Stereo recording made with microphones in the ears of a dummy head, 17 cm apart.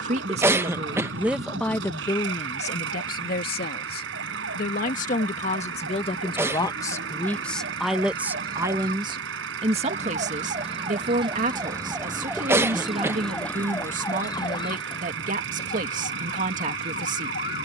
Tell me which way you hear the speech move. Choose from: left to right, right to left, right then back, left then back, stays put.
left then back.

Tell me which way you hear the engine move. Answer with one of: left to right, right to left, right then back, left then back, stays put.
stays put.